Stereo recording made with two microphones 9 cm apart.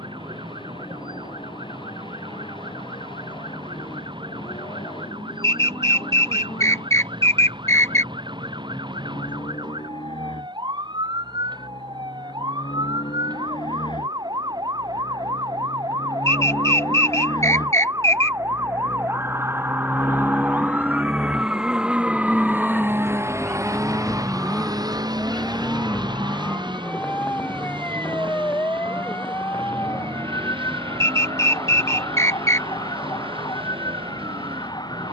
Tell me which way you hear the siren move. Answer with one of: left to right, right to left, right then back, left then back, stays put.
right to left.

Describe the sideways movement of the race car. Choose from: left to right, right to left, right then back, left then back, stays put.
left to right.